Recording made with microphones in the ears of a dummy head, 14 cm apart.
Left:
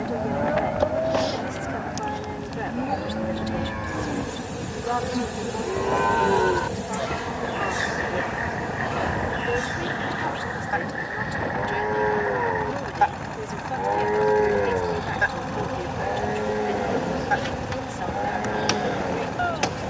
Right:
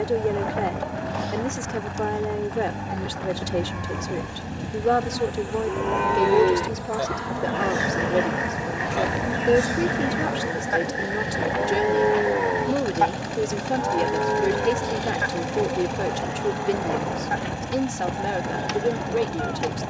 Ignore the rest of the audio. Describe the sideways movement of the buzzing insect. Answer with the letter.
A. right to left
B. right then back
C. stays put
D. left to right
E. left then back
B.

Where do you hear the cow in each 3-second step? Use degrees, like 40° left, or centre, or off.
60° left, 40° left, 30° right, 40° right, 10° left, 60° left, 60° left.